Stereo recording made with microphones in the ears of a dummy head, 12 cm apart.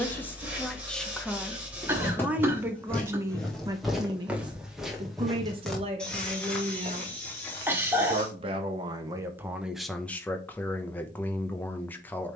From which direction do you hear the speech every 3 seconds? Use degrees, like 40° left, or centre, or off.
centre, 30° right, 40° right, 10° left.